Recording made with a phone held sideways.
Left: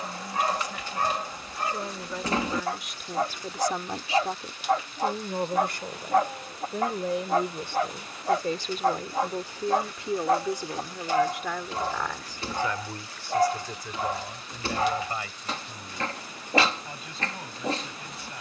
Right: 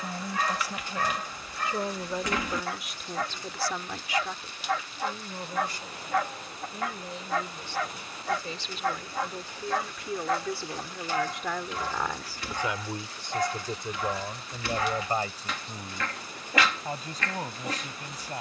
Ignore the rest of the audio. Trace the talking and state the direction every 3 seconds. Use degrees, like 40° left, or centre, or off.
20° right, 40° left, 60° left, 20° left, 20° right, 40° right.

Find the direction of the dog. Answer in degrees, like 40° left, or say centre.
30° left.